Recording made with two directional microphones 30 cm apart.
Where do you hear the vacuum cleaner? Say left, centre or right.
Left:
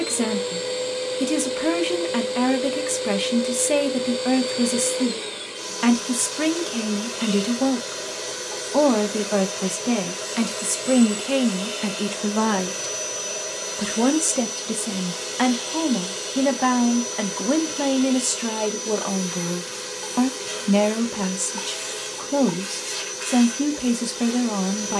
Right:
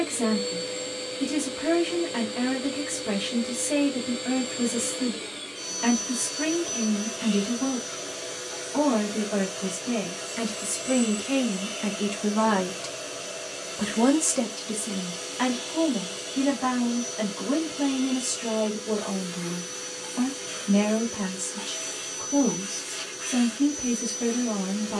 left.